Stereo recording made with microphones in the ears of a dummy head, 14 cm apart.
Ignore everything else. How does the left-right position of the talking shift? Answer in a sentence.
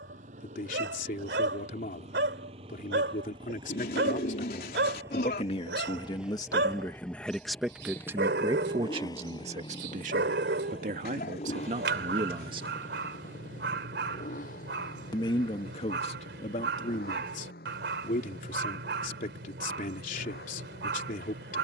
In this clip you hear the talking move from left to right and back again.